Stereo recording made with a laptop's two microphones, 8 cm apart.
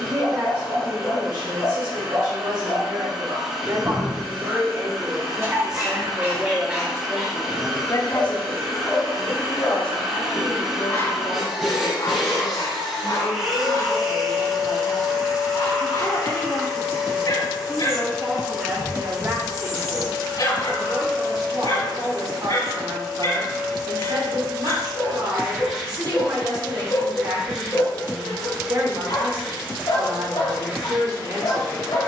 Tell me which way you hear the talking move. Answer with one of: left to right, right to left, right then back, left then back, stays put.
left then back.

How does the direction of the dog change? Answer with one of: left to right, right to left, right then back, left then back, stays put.
right to left.